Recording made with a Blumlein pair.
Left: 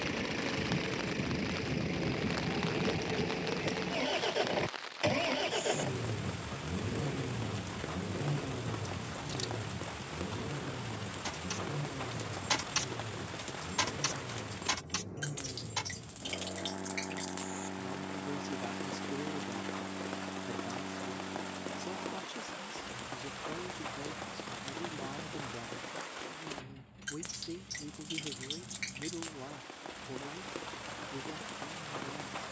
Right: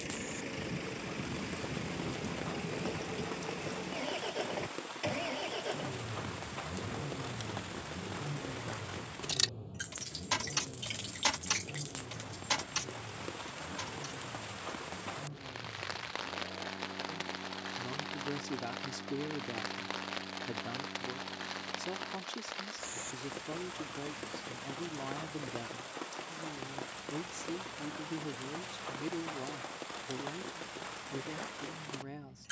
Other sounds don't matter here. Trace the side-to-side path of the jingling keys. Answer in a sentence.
You can hear the jingling keys move from right to left.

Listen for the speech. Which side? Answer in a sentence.
You can hear the speech in the centre.